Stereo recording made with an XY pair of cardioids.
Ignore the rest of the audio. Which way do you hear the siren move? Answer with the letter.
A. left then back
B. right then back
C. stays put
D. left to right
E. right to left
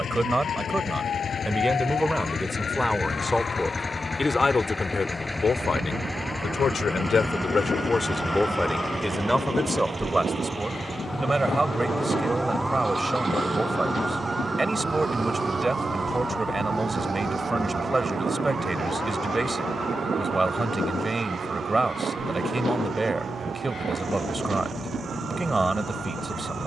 D.